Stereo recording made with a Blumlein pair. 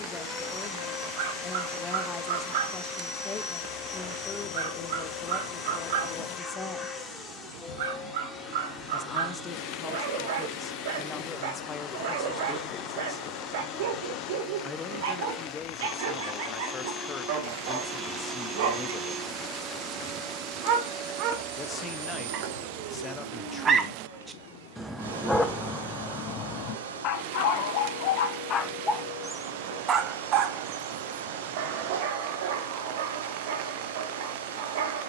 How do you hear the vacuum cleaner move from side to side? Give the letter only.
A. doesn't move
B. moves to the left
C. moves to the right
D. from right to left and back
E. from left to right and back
C.